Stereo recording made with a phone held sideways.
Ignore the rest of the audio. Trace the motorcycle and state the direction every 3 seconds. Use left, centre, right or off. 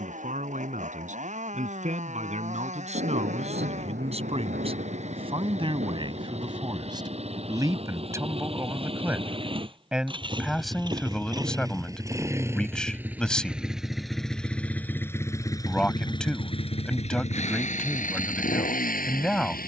right, right, right, right, centre, left, left.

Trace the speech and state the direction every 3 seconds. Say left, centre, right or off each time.
right, right, right, centre, centre, centre, centre.